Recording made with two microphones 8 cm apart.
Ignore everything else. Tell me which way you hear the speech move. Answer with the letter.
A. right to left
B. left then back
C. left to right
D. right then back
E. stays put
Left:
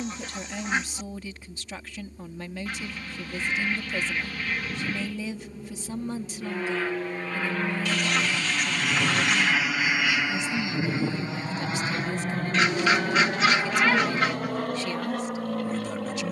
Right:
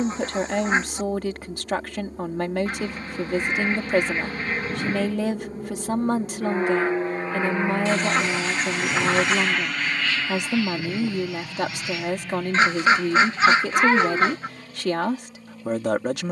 E.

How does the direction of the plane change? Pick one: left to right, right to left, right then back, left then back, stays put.
right to left.